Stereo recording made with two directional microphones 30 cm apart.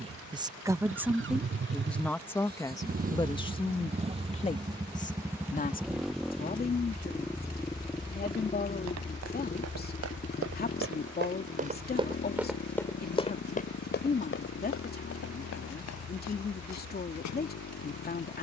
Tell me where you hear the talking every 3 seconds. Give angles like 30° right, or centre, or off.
centre, 20° left, 30° left, 30° left, 30° left, 30° left.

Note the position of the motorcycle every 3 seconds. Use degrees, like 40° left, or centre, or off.
40° right, 20° right, 10° left, 30° left, 40° left, 50° left.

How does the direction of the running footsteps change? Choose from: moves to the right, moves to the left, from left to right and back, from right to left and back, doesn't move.
moves to the left.